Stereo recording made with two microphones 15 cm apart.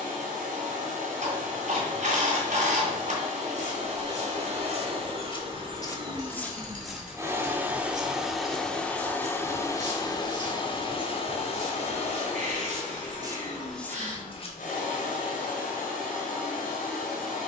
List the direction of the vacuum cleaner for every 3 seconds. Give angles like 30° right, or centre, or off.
60° right, 50° right, 10° right, 30° left, 60° left, 70° left.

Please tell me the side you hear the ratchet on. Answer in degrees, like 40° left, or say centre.
60° right.